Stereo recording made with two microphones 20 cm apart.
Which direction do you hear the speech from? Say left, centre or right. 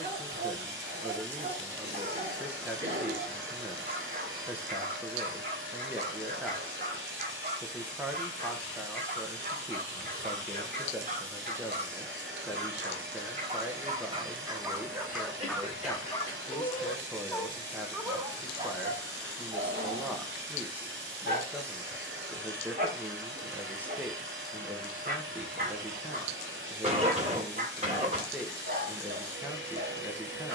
centre.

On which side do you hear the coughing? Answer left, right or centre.
right.